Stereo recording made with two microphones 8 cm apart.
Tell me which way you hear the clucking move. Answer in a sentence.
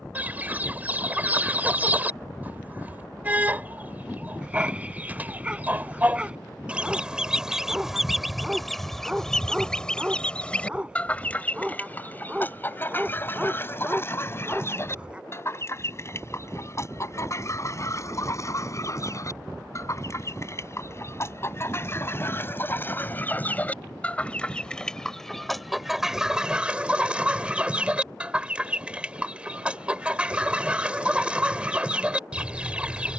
In this clip you hear the clucking move from right to left and back again.